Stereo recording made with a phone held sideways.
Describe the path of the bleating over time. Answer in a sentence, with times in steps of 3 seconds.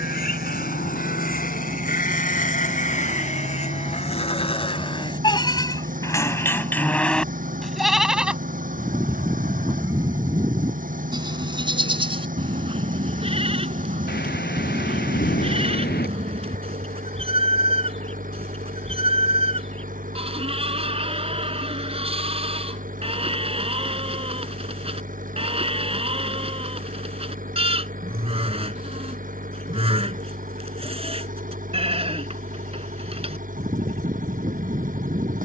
In this clip you hear the bleating on the left from 0 s, in the centre from 6 s and on the right from 9 s.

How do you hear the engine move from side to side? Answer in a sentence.
In this clip you hear the engine stay put.